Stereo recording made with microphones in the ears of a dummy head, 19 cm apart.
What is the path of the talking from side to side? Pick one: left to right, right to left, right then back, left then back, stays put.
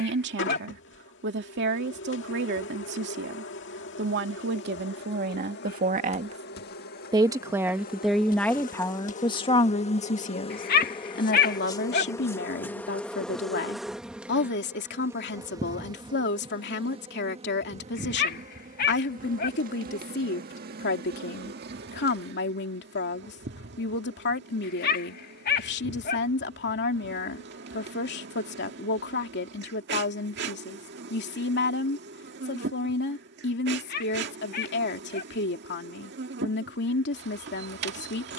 right to left.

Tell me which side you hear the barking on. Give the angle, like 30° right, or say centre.
50° left.